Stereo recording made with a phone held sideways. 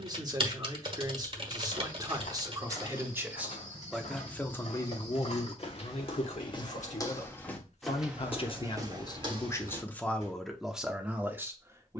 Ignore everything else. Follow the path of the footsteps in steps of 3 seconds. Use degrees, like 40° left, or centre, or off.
70° left, 60° left, 10° left, 40° right.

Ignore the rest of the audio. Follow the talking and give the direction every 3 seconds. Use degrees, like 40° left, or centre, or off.
30° right, 10° left, 50° left, centre.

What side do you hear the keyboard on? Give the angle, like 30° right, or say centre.
40° right.